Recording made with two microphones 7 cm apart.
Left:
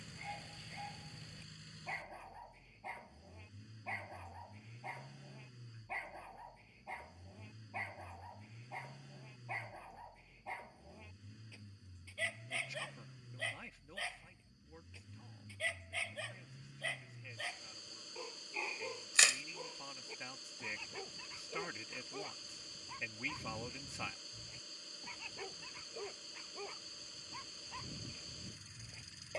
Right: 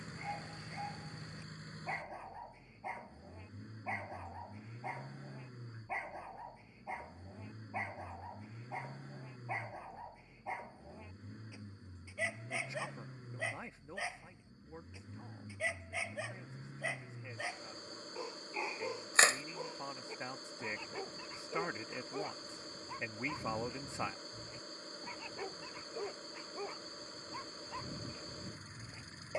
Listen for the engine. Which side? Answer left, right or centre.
right.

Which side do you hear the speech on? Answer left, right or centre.
right.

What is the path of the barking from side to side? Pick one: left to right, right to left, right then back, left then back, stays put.
stays put.